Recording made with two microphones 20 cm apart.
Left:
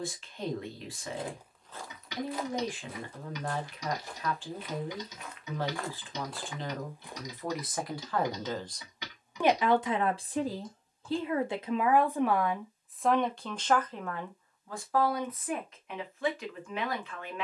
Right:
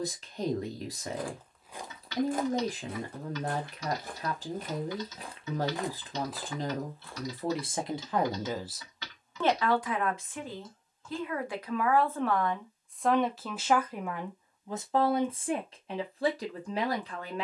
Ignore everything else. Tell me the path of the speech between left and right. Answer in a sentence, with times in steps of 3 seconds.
In this clip you hear the speech on the right from 0 s, on the left from 9 s, in the centre from 12 s and on the right from 15 s.